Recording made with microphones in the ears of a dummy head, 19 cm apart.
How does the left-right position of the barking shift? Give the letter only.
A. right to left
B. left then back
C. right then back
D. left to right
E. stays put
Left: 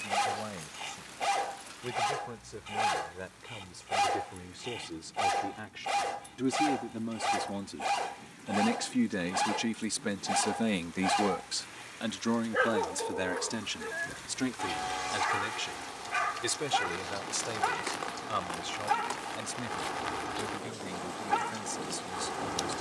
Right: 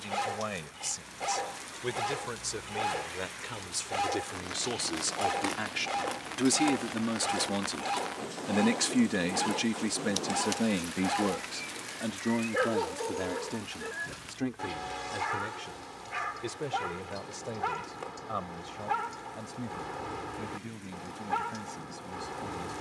E.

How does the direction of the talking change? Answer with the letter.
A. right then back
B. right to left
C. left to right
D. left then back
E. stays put
B.